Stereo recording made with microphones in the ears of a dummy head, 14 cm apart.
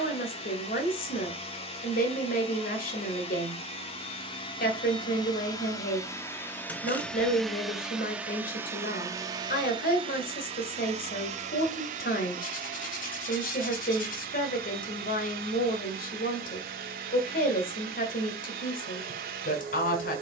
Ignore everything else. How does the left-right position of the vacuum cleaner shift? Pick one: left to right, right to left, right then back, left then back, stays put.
left to right.